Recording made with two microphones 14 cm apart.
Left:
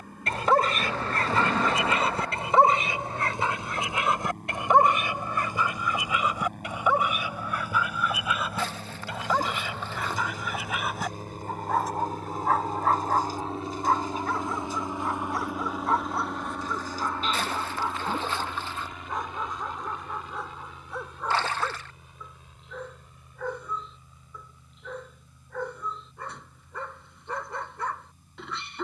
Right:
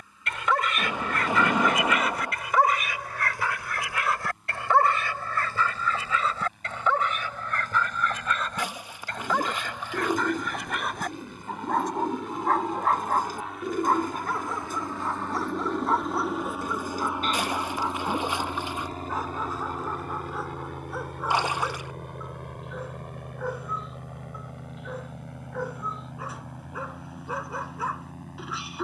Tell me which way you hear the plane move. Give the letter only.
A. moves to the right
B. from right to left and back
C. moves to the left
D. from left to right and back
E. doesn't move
A.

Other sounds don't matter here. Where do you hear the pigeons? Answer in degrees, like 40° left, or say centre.
60° right.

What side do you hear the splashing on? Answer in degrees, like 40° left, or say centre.
10° right.